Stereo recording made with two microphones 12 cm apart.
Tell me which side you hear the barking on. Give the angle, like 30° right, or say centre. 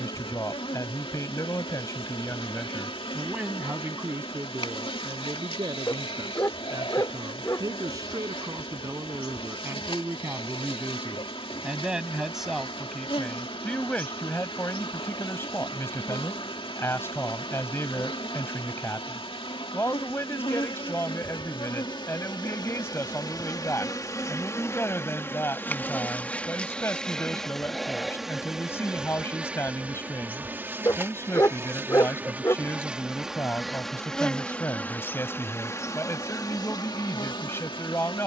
30° left.